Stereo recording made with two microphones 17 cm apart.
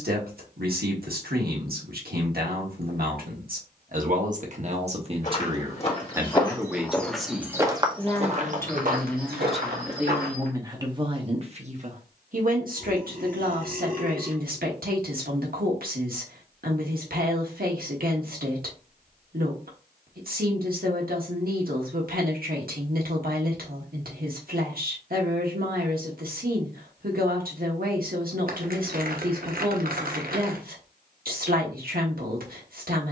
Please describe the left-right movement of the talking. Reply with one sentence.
In this clip you hear the talking move from right to left and back again.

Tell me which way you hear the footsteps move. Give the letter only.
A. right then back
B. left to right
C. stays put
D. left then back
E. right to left
B.